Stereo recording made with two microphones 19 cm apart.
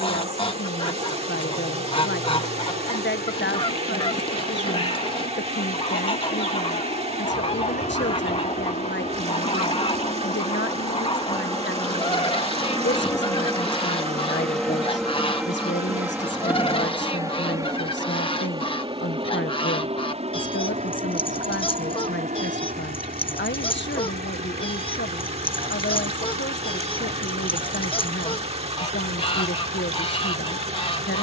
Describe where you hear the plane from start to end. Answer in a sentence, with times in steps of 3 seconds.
In this clip you hear the plane on the left from 0 s, in the centre from 12 s and on the right from 18 s.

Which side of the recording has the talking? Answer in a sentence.
You can hear the talking on the left.